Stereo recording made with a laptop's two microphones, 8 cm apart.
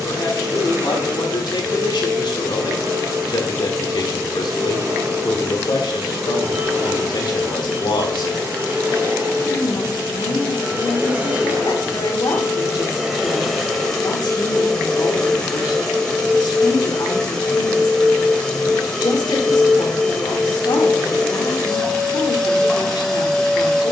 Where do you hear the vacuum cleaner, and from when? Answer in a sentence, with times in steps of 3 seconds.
In this clip you hear the vacuum cleaner on the right from 0 s and in the centre from 12 s.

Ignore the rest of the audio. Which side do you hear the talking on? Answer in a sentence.
In this clip you hear the talking on the left.